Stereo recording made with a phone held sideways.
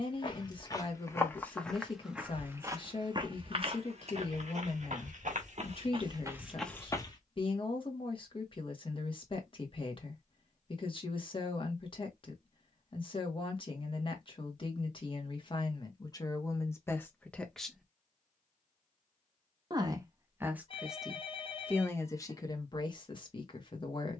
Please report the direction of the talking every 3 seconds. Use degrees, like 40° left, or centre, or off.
40° left, 40° left, 40° left, 40° left, 40° left, 20° left, 20° right, 30° left.